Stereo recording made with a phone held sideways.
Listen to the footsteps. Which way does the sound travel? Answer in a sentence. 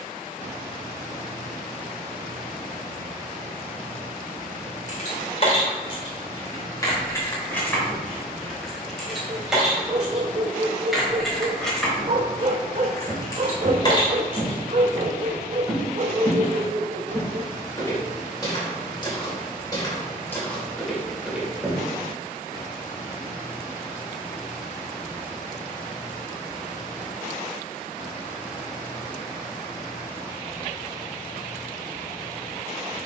You can hear the footsteps move from right to left and back again.